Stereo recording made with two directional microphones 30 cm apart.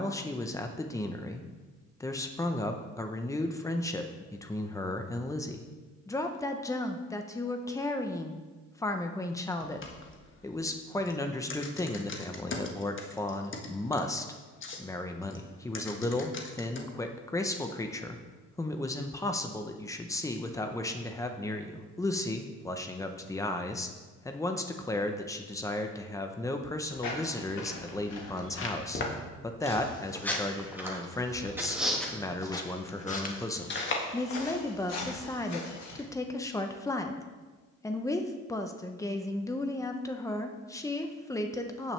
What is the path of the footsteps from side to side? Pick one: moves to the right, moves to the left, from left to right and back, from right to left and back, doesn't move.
from left to right and back.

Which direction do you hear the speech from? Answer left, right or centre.
centre.